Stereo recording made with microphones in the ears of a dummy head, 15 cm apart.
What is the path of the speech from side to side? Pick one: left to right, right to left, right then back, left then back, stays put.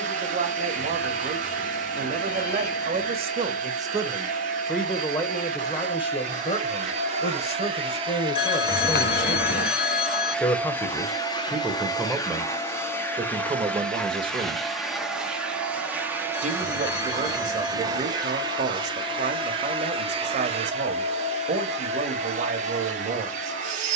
left then back.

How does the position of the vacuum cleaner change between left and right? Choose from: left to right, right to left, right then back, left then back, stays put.
left then back.